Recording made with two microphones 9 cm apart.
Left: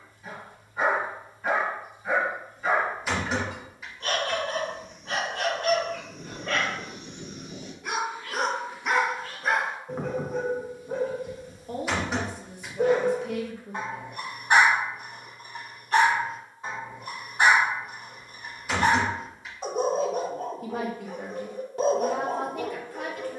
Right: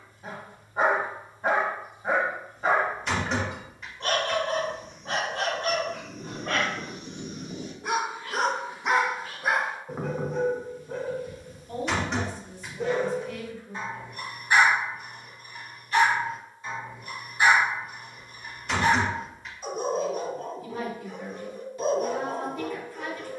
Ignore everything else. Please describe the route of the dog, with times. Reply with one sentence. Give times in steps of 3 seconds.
In this clip you hear the dog on the right from 0 s, in the centre from 9 s and on the left from 12 s.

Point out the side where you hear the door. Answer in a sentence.
You can hear the door in the centre.